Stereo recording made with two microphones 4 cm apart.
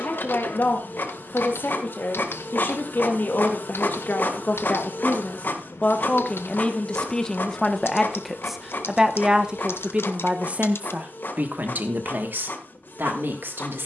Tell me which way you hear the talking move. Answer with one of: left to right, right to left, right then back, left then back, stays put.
left to right.